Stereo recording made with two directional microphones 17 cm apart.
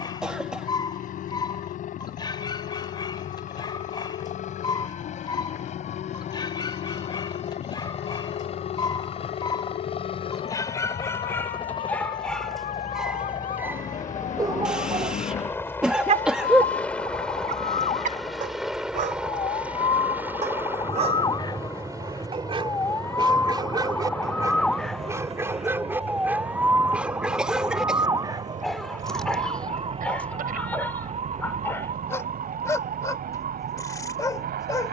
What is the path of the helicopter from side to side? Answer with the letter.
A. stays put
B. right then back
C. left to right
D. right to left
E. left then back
C.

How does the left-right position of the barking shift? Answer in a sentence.
You can hear the barking move from left to right and back again.